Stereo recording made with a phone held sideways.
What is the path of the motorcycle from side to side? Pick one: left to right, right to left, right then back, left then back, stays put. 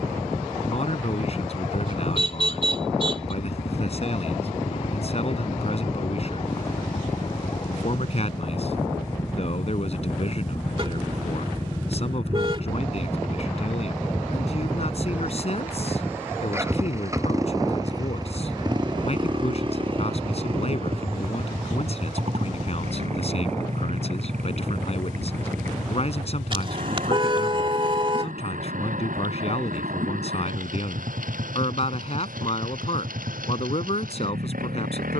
left to right.